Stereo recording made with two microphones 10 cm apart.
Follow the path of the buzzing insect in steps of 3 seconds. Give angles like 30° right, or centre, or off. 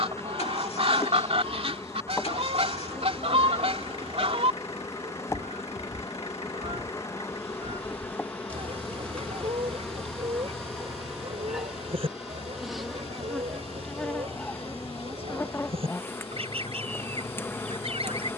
30° left, 30° left, 20° left, centre, 10° left, 20° left.